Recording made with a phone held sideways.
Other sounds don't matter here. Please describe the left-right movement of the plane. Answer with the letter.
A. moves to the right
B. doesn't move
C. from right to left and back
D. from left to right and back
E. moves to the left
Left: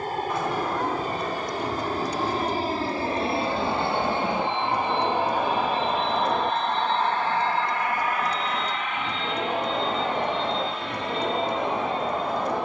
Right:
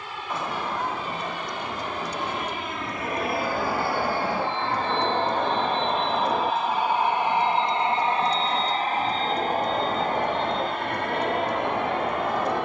A.